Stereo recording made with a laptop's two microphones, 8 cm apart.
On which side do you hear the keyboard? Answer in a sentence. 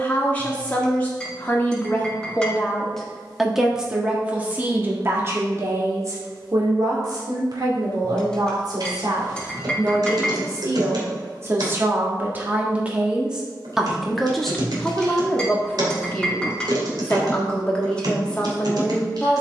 In this clip you hear the keyboard on the right.